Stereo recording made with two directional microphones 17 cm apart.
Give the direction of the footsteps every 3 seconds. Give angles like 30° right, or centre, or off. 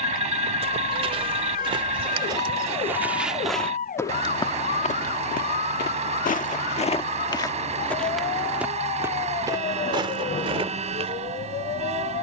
30° right, 30° left, 20° left, 30° right.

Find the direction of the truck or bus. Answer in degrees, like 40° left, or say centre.
40° right.